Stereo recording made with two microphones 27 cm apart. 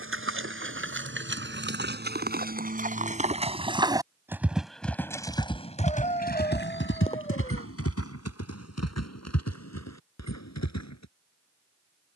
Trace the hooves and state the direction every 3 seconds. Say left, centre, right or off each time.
right, centre, left, left.